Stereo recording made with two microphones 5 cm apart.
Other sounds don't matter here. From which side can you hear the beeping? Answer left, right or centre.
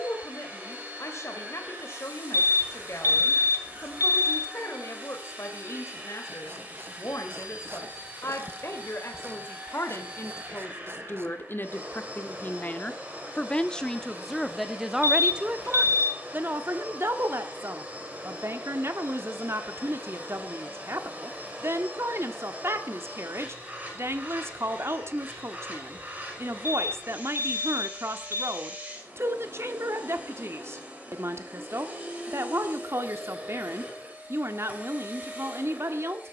left.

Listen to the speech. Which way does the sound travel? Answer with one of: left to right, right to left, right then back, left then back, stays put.
left to right.